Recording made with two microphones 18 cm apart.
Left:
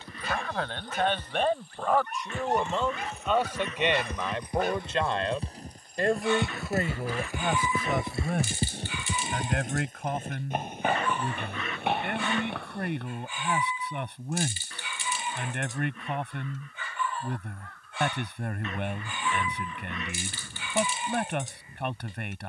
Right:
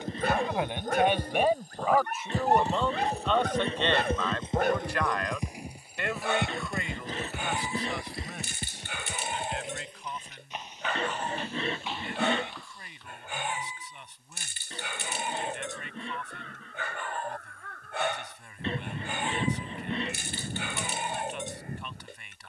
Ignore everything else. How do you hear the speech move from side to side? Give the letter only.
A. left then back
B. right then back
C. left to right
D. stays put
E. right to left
E.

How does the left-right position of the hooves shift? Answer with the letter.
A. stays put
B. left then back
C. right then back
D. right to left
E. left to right
D.